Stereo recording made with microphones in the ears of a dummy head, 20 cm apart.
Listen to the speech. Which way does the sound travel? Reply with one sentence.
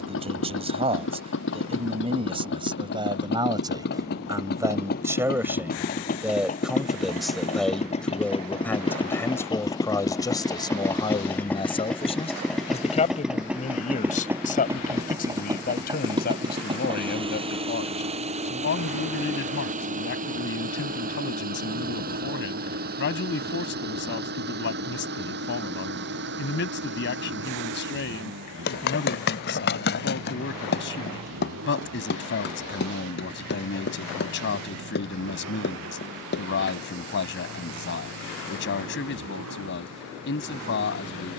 You can hear the speech move from right to left.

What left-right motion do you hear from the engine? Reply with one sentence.
In this clip you hear the engine move from left to right.